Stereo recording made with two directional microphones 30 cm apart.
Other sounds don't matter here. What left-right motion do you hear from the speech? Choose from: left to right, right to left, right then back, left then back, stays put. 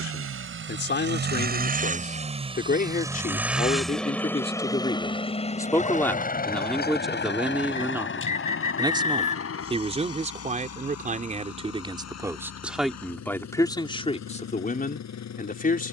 right then back.